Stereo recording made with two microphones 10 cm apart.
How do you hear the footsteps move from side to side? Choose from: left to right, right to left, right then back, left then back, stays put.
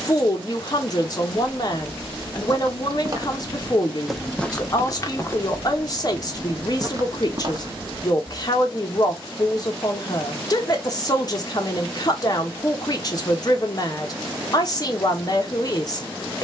left then back.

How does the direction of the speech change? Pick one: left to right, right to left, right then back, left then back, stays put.
stays put.